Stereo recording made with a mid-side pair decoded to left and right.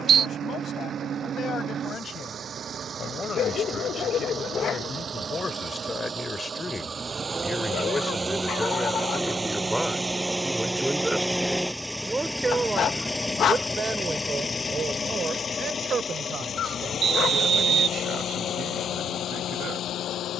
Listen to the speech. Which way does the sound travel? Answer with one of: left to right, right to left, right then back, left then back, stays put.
left to right.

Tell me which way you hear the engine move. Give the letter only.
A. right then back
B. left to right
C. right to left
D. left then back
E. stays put
C.